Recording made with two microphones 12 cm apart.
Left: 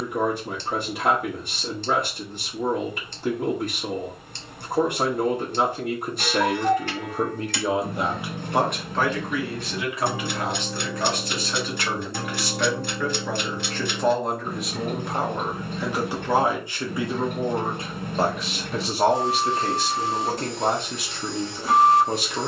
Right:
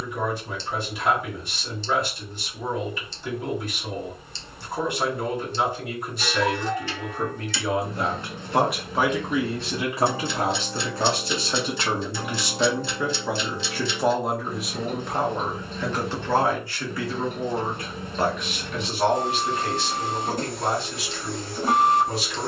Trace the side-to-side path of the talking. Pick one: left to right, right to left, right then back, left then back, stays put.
right then back.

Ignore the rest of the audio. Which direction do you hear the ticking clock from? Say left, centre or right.
left.